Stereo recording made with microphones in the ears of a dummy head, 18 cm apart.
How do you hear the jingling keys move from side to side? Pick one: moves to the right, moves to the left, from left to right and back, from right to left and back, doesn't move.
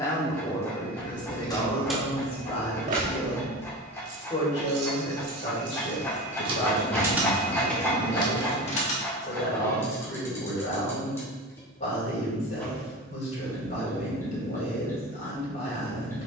from left to right and back.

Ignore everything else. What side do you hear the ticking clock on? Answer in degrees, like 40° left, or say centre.
10° left.